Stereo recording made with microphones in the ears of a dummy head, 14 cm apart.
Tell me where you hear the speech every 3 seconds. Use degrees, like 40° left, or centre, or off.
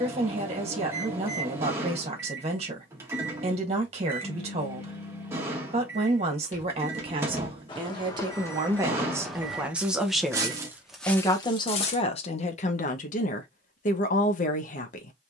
40° right, 40° right, 30° right, 10° left, 50° left.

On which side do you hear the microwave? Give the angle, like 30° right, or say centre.
20° right.